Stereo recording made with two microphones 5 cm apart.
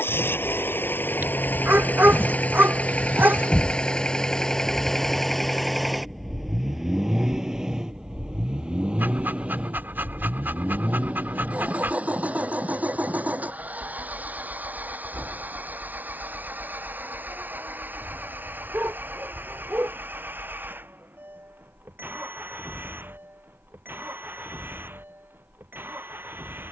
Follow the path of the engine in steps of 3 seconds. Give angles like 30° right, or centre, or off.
40° left, 10° left, 10° right, 30° right, 40° right, 40° right, 50° right, 50° right, 50° right.